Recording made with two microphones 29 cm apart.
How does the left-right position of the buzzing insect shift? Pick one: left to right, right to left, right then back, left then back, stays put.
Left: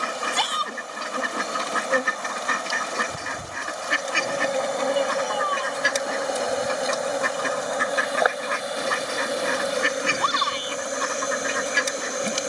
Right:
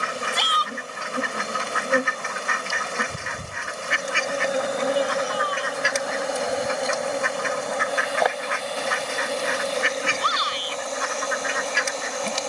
right to left.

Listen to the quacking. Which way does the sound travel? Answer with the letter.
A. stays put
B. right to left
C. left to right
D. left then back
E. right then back
A.